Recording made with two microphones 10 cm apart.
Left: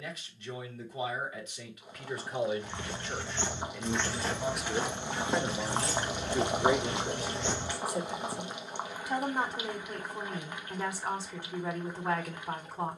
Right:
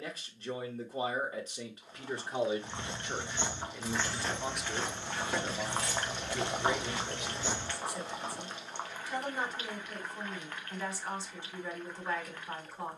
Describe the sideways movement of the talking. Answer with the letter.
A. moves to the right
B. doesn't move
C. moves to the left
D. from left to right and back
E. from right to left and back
C.